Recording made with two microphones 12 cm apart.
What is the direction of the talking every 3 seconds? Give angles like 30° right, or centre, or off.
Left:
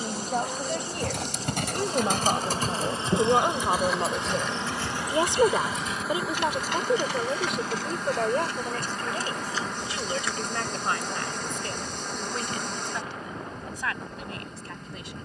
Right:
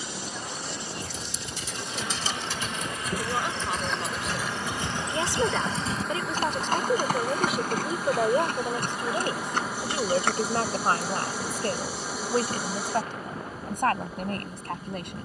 50° left, 30° left, centre, 30° right, 50° right.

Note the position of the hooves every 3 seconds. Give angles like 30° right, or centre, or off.
50° left, 10° right, 40° right, 50° right, off.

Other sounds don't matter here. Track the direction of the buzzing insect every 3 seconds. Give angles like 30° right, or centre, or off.
40° left, 20° left, 10° right, 10° right, 10° right.